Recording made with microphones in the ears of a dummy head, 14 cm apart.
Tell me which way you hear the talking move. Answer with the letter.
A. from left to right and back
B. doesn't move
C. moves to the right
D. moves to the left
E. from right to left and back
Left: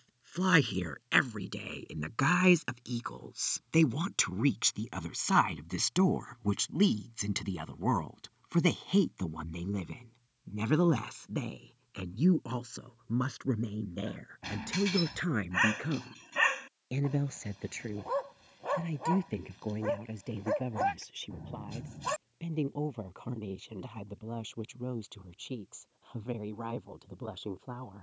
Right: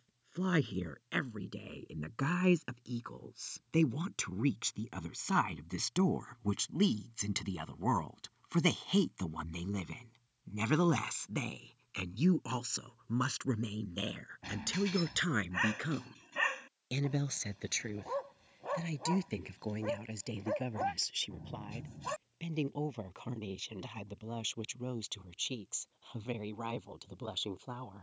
C.